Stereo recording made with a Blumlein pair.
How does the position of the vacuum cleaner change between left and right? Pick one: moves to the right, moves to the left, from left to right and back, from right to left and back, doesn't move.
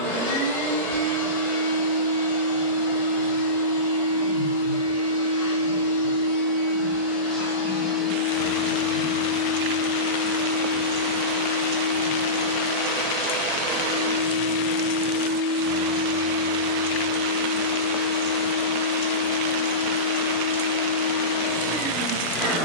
moves to the right.